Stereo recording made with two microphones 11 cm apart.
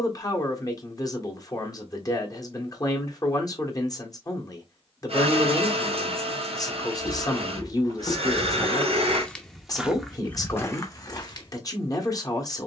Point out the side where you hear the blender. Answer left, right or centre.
right.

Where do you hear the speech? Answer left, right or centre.
left.